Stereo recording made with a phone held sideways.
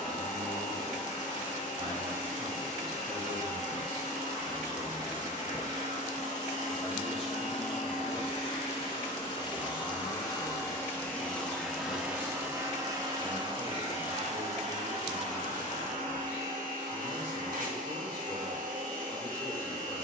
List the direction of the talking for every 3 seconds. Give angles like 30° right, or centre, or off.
50° right, 30° right, 10° left, 30° left, 30° left, 40° left, 40° left.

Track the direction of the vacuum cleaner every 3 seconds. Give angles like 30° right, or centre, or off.
60° left, 60° left, 50° left, 20° left, 40° right, 70° right, 70° right.